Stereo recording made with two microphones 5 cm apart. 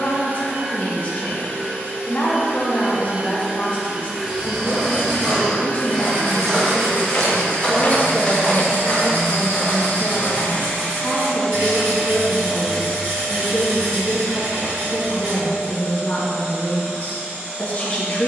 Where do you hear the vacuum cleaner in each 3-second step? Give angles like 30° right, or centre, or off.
50° right, centre, 50° left, 30° left, 30° right, 50° right.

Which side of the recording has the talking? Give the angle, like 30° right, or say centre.
40° left.